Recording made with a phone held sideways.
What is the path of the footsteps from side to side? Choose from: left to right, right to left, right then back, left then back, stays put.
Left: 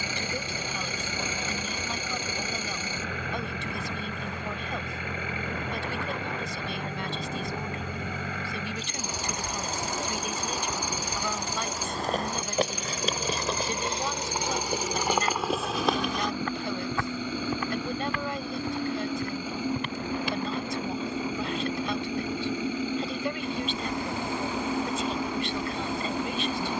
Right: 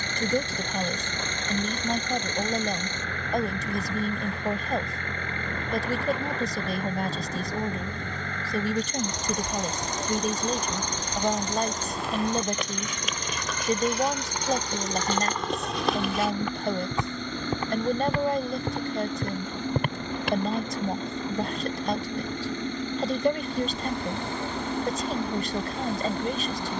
left to right.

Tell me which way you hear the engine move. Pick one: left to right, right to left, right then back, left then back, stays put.
stays put.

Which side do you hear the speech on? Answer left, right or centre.
right.